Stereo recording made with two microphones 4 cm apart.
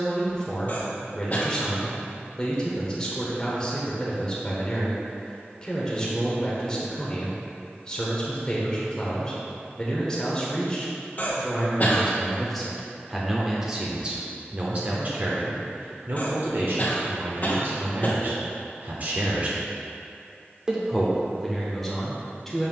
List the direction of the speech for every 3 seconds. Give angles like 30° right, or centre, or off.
20° left, 20° left, 20° left, 20° left, 10° right, 60° right, 40° right, centre.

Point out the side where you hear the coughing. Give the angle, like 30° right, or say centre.
40° left.